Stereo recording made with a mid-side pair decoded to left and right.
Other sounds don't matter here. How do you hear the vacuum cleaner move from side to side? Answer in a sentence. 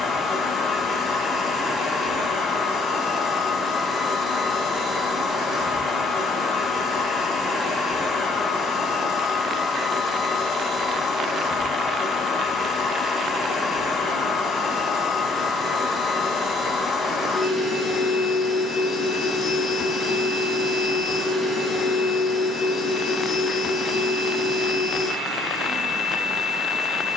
In this clip you hear the vacuum cleaner stay put.